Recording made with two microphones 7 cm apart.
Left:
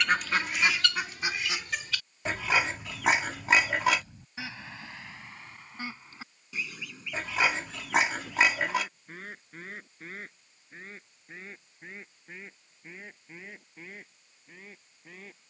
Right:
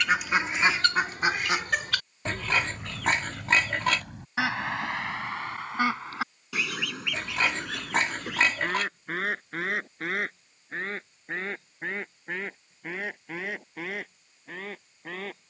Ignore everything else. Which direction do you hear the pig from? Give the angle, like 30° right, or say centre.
10° left.